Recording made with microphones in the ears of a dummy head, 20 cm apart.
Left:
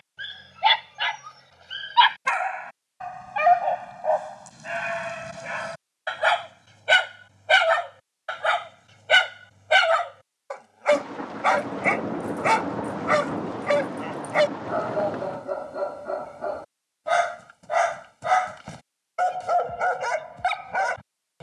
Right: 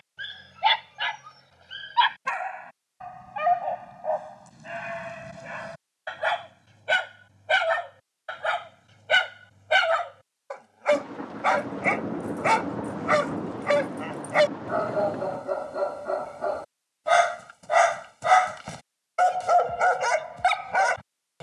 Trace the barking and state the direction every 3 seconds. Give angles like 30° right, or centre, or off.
20° left, 30° left, 30° left, 10° left, centre, 10° right, 20° right.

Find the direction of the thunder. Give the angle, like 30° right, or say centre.
30° left.